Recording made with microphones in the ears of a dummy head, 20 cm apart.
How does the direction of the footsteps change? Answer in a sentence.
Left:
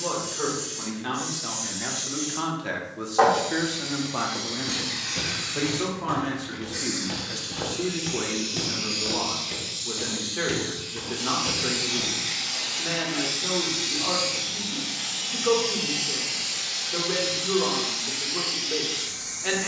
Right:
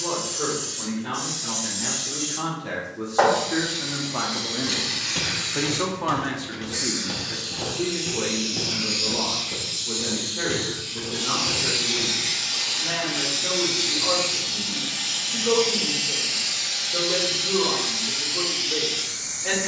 In this clip you hear the footsteps move to the left.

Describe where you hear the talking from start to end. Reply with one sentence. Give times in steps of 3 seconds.
You can hear the talking on the left from 0 s, in the centre from 3 s and on the left from 6 s.